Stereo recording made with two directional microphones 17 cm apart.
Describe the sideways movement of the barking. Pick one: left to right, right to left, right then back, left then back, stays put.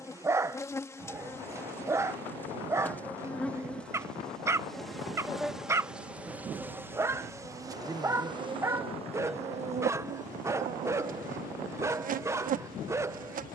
stays put.